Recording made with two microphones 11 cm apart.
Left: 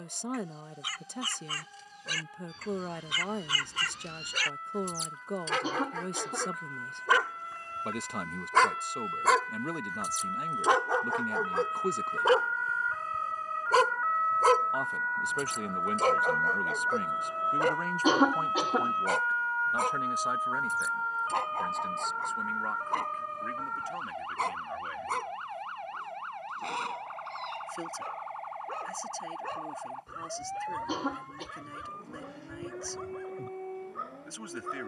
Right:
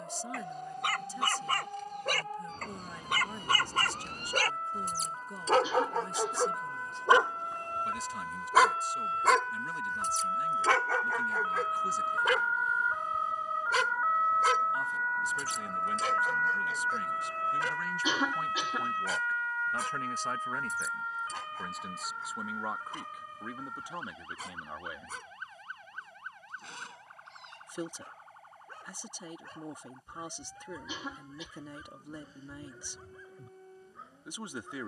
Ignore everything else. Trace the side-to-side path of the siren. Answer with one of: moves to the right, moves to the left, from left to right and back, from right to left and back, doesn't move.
moves to the left.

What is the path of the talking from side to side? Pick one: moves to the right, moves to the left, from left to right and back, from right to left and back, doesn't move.
moves to the right.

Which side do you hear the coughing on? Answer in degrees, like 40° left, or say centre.
50° left.